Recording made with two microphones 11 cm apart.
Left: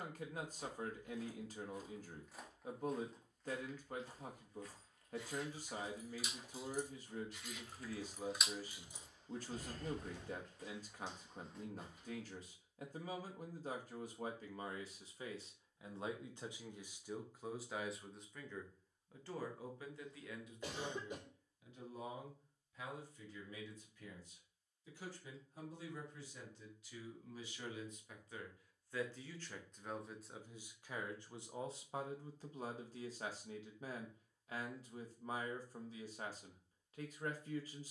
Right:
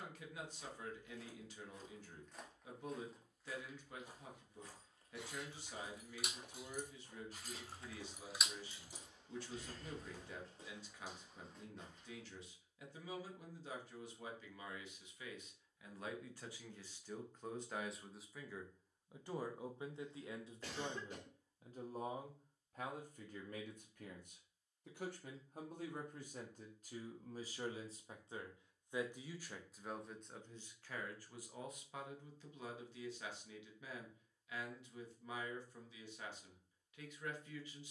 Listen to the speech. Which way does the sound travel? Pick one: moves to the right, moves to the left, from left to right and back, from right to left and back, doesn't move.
from left to right and back.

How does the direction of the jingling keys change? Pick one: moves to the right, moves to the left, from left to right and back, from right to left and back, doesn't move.
moves to the left.